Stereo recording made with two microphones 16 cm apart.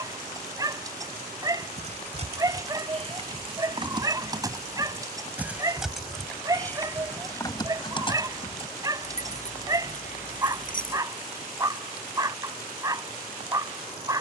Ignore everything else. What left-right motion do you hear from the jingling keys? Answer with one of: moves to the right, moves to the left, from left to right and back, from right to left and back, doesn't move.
moves to the left.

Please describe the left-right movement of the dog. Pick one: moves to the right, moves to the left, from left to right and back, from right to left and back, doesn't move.
doesn't move.